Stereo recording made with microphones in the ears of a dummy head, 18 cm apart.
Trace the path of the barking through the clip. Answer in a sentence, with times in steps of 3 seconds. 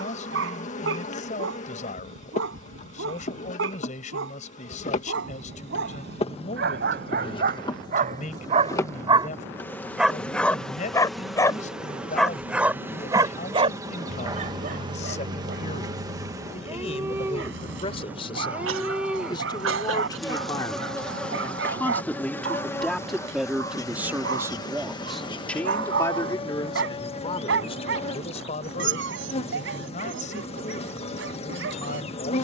In this clip you hear the barking on the right from 0 s, in the centre from 9 s and on the right from 12 s.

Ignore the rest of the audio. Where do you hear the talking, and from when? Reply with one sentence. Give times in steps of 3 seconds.
In this clip you hear the talking on the left from 0 s, in the centre from 21 s and on the left from 27 s.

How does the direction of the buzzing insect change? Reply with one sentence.
In this clip you hear the buzzing insect go right and come back.